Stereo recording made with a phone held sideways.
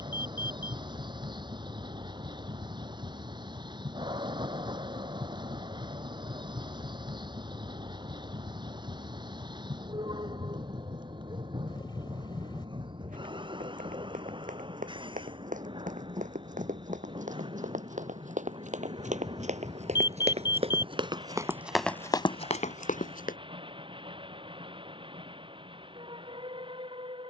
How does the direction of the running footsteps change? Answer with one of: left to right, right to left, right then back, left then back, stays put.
right to left.